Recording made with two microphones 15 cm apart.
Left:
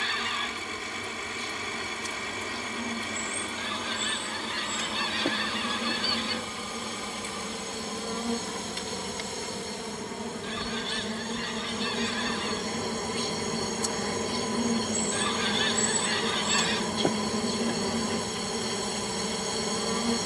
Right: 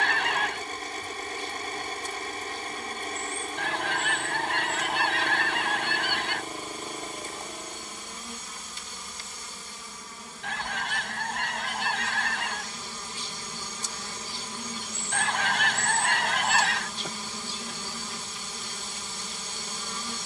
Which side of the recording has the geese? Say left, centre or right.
right.